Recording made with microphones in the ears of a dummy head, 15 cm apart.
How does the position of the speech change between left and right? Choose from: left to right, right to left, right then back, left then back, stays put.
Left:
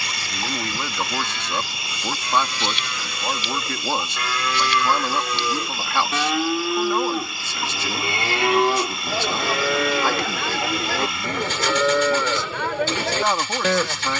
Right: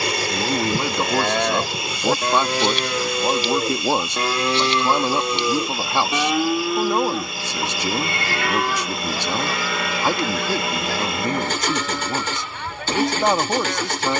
stays put.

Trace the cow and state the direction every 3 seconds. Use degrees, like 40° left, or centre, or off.
40° right, 30° right, 10° left, 40° left, 60° left.